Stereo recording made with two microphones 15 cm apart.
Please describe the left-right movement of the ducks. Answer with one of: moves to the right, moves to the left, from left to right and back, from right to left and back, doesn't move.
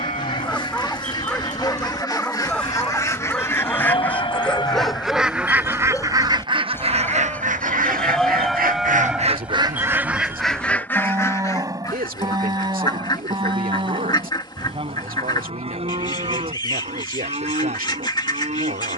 from left to right and back.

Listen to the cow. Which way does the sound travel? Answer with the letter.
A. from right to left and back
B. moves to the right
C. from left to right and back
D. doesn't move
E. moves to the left
B.